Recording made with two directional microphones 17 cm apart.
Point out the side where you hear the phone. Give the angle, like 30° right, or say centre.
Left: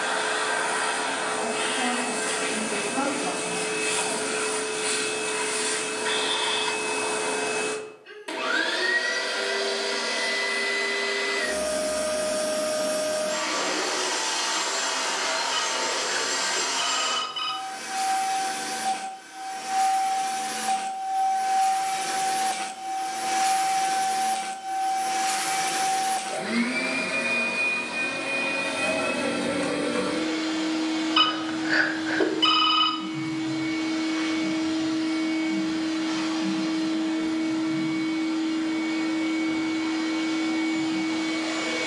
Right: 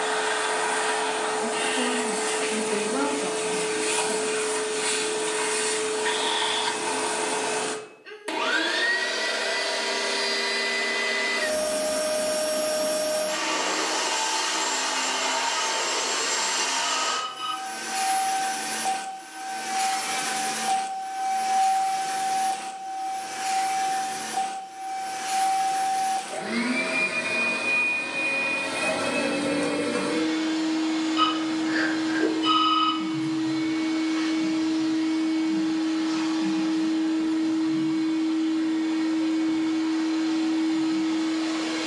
70° left.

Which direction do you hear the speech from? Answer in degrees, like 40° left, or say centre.
50° right.